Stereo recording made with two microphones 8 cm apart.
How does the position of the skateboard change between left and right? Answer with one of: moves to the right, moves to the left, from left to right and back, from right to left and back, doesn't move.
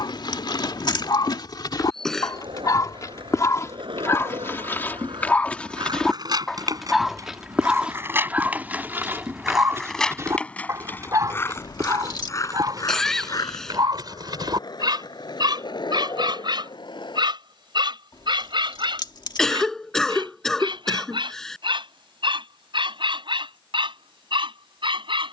moves to the left.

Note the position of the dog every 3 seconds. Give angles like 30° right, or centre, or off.
50° left, 30° left, 10° right, 30° right, 50° right, 60° right, 60° right, 60° right, 70° right.